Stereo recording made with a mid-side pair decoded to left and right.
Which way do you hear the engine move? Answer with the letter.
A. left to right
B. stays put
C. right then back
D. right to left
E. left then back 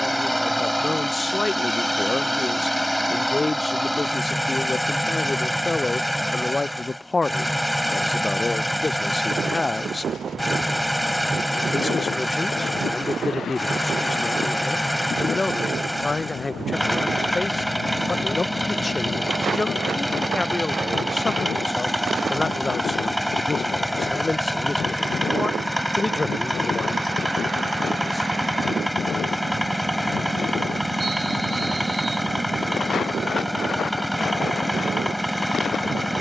B.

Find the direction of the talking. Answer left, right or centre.
left.